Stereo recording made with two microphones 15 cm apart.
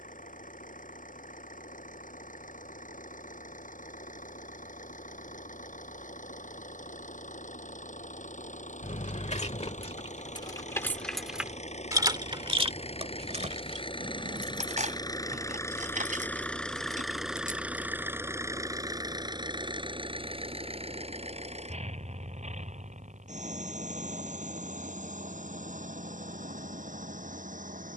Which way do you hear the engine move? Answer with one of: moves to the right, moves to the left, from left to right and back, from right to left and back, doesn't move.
moves to the right.